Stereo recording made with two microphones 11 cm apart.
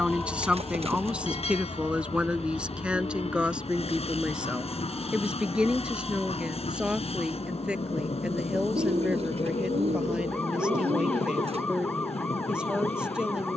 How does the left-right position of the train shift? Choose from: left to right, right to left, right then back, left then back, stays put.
stays put.